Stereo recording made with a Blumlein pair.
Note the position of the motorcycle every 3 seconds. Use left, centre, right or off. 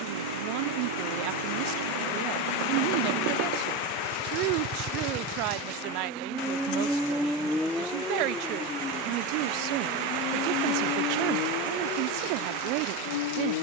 right, right, centre, left, left.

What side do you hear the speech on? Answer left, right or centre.
right.